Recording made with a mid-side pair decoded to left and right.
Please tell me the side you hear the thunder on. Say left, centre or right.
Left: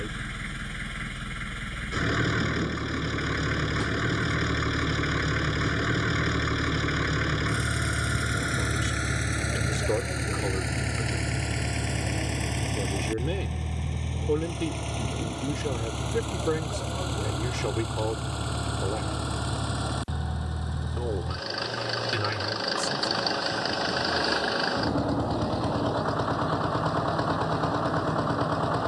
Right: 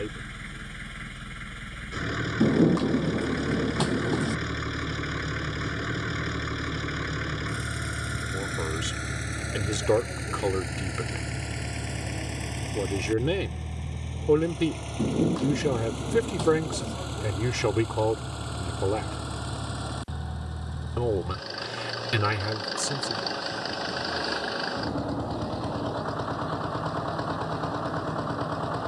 right.